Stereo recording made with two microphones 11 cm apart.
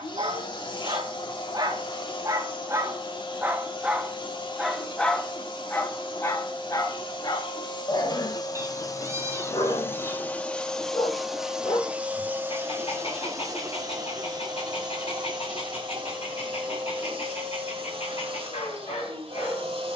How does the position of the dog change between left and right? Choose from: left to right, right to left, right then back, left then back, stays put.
right to left.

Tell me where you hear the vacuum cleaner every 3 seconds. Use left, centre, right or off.
left, left, left, centre, right, right, right.